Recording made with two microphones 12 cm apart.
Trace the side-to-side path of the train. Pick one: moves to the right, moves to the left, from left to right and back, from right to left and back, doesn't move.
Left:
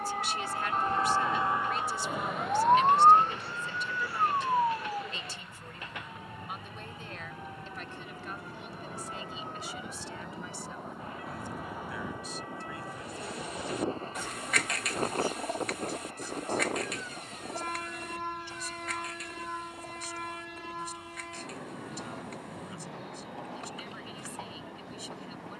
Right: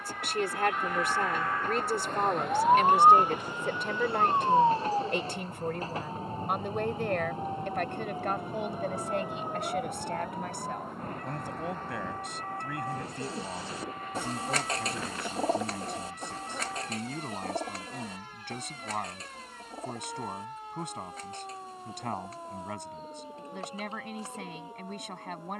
moves to the left.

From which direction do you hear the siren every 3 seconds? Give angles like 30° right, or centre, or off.
20° left, 20° right, 40° right, 50° right, 50° right, 50° right, 60° right, 60° right, 60° right.